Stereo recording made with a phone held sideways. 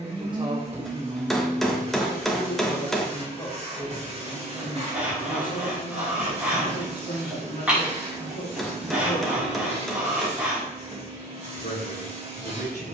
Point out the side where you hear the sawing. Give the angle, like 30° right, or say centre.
10° right.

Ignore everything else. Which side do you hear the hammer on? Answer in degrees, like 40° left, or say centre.
centre.